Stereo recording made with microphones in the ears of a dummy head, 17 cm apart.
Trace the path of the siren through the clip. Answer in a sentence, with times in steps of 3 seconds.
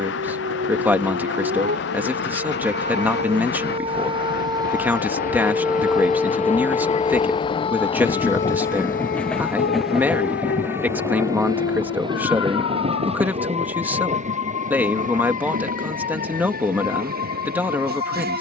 In this clip you hear the siren on the right from 0 s and on the left from 6 s.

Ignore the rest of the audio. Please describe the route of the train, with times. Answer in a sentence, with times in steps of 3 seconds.
In this clip you hear the train on the left from 0 s, in the centre from 9 s and on the right from 12 s.